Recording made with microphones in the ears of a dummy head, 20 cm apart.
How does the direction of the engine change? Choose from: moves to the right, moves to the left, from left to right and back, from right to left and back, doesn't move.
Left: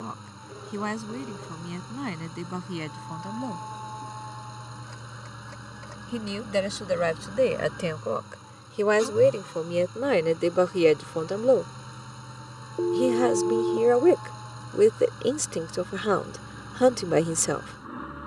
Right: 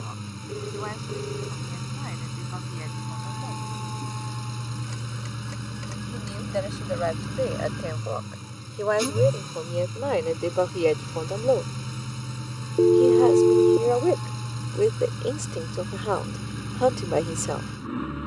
doesn't move.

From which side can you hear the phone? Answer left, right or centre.
right.